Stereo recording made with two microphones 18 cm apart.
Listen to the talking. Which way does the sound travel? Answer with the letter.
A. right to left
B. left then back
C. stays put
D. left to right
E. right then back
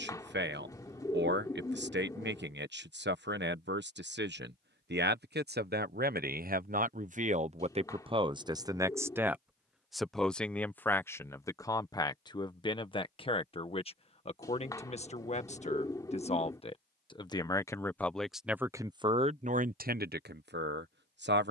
B.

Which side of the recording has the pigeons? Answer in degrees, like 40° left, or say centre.
20° left.